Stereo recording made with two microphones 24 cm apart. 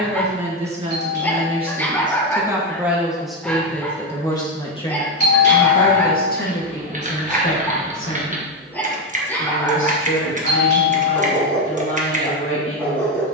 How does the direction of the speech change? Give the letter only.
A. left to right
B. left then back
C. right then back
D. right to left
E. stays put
D.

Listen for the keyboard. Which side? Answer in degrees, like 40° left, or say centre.
30° right.